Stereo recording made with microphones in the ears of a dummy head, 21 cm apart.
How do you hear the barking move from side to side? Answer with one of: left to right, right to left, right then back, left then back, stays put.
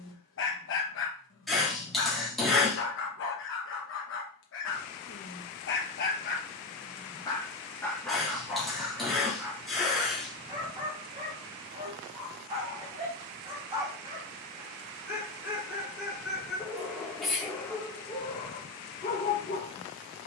right then back.